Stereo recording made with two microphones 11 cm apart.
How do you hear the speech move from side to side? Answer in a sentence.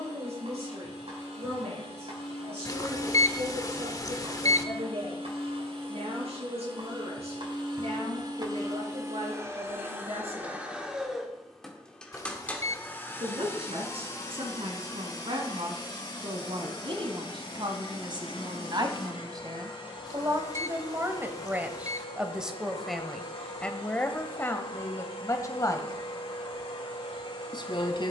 In this clip you hear the speech go from the right side to the left.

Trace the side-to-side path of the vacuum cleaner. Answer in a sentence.
In this clip you hear the vacuum cleaner move to the left.